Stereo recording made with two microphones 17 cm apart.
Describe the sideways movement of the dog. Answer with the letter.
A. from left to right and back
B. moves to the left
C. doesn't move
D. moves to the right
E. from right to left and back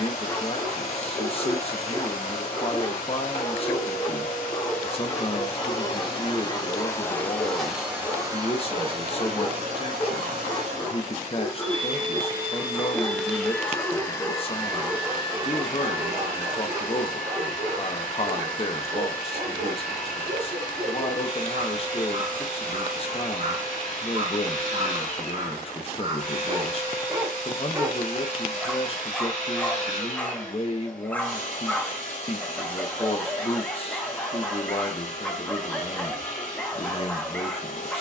A.